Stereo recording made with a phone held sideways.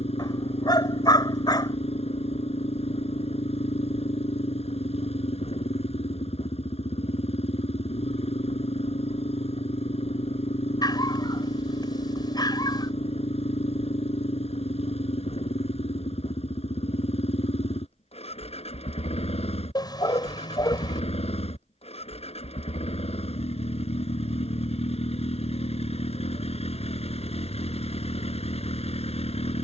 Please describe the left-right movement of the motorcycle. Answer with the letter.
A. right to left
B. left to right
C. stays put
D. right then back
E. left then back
C.